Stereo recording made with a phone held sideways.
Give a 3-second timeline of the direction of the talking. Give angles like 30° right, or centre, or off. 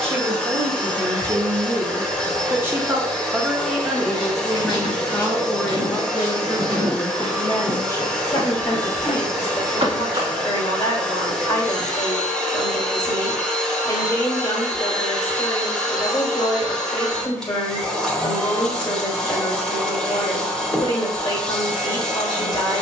30° right, centre, 20° left, 30° left, 30° left, 30° left, 30° left, 30° left.